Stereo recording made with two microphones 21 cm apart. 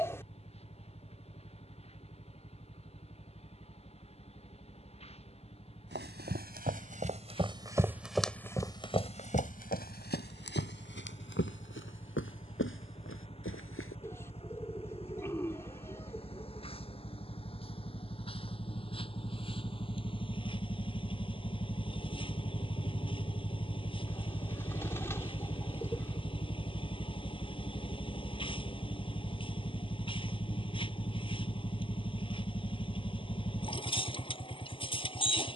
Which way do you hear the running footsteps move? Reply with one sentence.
In this clip you hear the running footsteps travel towards the left.